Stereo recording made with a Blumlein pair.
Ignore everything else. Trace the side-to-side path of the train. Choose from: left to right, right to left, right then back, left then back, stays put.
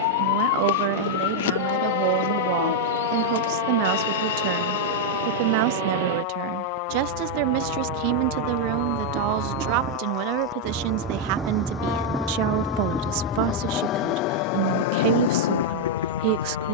right to left.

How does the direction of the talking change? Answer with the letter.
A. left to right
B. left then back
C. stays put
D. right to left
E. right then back
C.